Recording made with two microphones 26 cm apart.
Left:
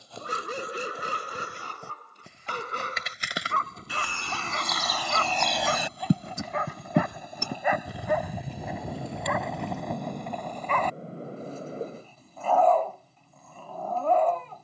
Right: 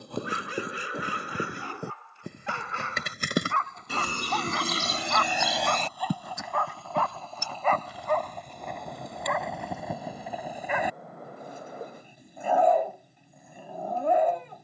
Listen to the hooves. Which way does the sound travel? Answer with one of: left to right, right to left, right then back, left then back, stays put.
right to left.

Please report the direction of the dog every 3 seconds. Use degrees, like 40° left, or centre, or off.
50° left, 30° left, 10° left, 10° right, 20° right.